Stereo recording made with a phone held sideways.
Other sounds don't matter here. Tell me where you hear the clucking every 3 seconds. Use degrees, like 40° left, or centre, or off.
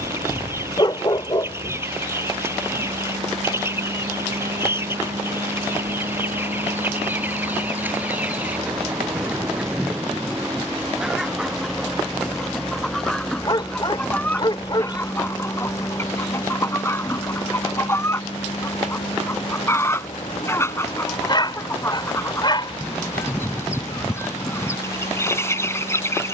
20° right, 20° right, 10° right, 10° right, 10° left, 20° left, 20° left, 20° left, 20° left.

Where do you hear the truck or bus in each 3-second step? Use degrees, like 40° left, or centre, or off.
60° right, 50° right, 40° right, 20° right, 10° left, 30° left, 50° left, 60° left, 60° left.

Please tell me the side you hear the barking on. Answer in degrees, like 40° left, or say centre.
30° left.